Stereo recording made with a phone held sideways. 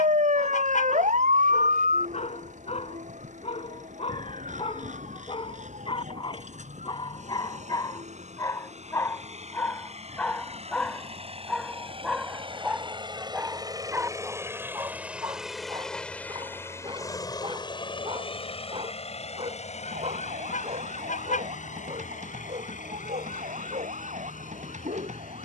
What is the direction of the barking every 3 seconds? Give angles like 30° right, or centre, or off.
60° left, 50° left, 30° left, 10° left, 10° right, 30° right, 50° right, 50° right, 60° right.